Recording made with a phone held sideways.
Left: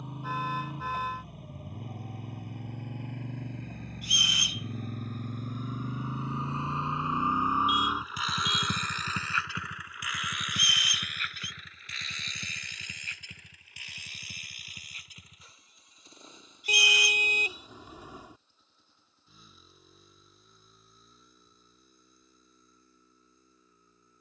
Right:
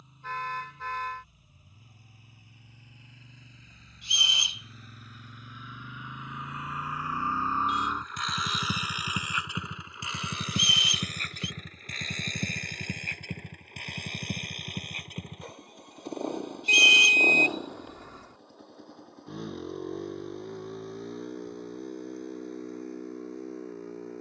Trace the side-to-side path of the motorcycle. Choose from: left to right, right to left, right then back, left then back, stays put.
left to right.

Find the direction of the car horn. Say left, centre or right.
centre.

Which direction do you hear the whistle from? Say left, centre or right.
right.